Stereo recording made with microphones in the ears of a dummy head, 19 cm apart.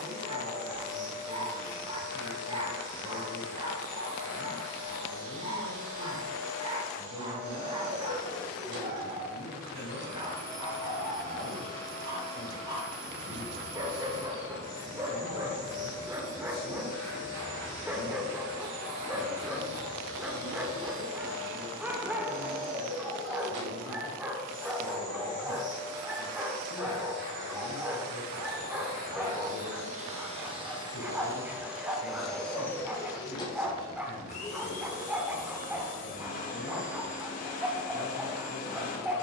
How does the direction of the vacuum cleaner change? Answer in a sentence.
You can hear the vacuum cleaner move from right to left.